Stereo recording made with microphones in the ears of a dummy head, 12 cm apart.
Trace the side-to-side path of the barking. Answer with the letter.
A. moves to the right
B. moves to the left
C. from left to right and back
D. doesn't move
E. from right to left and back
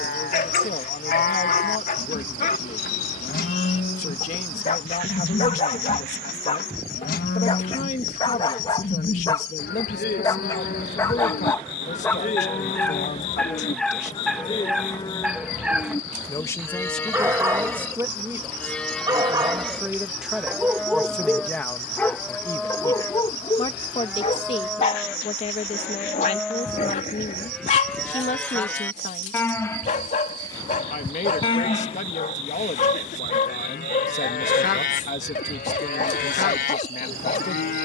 C.